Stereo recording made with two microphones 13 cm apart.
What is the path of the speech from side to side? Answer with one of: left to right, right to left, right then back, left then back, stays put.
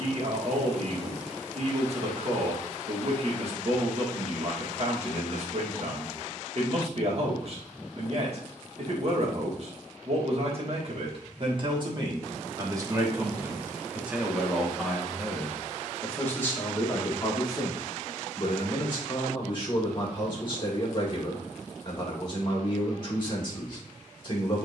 right to left.